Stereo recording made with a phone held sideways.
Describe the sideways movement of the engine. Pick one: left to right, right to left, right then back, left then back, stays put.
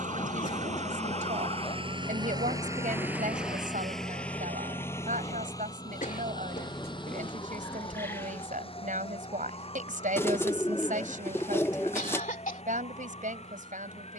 right to left.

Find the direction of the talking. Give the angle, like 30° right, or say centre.
80° right.